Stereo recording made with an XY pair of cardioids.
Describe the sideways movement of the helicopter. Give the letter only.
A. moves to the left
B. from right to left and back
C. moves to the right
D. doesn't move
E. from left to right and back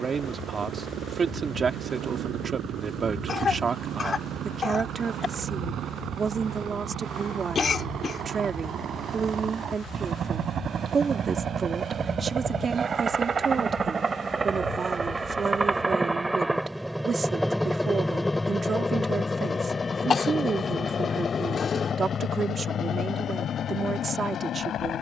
A.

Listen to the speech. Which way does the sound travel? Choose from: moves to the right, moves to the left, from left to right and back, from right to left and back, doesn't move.
doesn't move.